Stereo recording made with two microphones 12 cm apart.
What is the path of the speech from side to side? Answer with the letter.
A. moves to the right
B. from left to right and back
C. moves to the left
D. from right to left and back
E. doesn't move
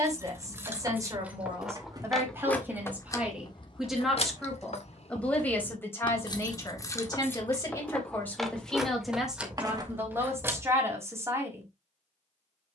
D.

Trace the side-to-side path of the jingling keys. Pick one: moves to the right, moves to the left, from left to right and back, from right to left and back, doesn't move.
from right to left and back.